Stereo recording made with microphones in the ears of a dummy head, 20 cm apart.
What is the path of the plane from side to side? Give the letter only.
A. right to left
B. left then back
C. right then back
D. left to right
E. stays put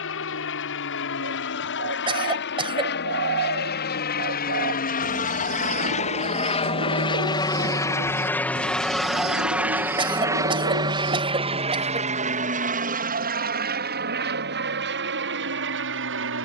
D.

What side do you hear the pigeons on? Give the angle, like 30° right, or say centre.
60° right.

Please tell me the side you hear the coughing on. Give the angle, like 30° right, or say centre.
20° right.